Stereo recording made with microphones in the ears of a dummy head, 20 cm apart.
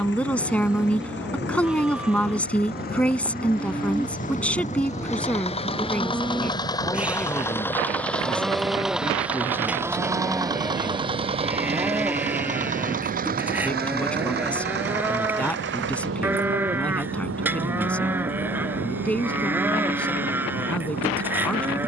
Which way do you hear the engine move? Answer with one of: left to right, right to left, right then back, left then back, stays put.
left to right.